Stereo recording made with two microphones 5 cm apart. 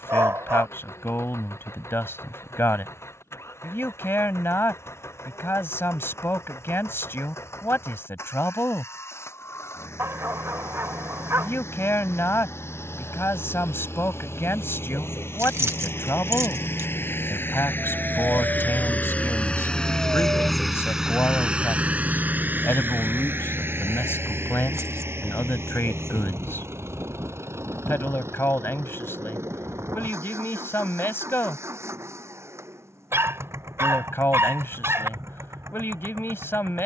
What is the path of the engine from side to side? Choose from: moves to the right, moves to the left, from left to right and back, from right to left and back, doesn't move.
moves to the right.